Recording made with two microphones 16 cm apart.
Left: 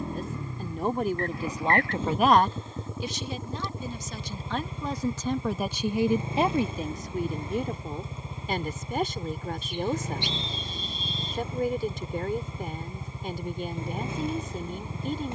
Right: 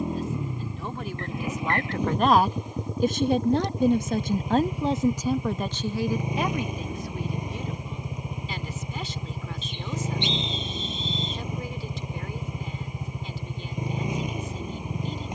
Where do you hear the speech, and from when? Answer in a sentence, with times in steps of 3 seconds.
In this clip you hear the speech on the left from 0 s, on the right from 3 s and on the left from 6 s.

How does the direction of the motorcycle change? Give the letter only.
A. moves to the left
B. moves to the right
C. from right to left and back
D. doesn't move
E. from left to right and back
D.